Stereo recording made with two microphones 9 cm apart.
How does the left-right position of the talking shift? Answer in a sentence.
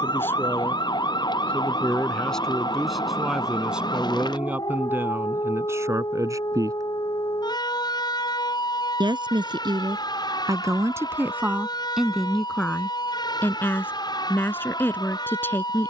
You can hear the talking move from left to right and back again.